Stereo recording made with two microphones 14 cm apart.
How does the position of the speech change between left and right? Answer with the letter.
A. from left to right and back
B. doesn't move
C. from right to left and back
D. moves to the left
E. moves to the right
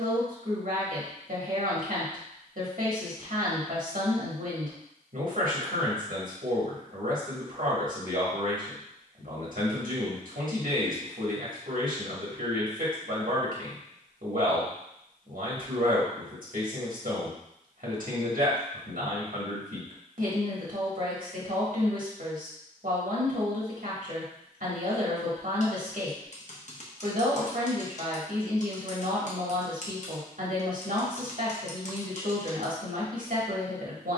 B.